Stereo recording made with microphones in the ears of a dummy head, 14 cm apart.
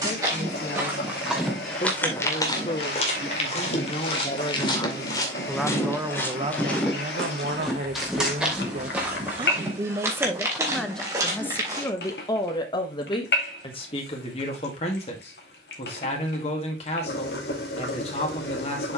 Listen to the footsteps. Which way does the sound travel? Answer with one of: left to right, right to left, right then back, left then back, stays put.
left then back.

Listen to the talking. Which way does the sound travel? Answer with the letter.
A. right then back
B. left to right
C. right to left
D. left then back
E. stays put
A.